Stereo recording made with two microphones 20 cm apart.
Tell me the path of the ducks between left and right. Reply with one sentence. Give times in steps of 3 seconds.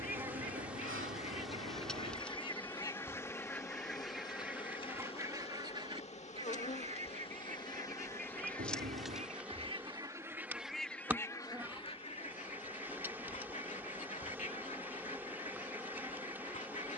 In this clip you hear the ducks on the left from 0 s, in the centre from 3 s, on the right from 6 s, in the centre from 9 s and on the left from 12 s.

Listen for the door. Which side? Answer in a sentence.
In this clip you hear the door on the right.